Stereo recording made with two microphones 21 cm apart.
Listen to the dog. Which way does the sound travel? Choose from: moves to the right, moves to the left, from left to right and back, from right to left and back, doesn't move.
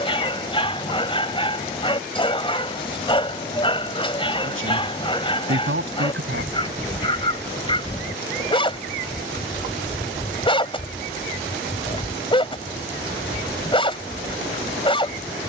doesn't move.